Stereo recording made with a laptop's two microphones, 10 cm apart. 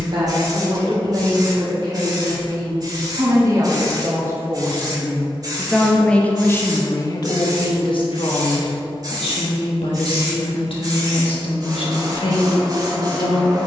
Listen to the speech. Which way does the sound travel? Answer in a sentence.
In this clip you hear the speech move to the left.